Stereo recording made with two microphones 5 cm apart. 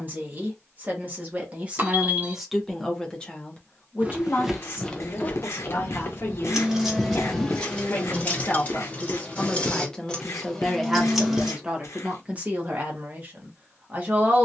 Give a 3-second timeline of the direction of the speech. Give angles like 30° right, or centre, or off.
20° right, 40° left, 40° left, centre, 30° right.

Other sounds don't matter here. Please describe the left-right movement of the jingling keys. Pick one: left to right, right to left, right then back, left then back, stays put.
left then back.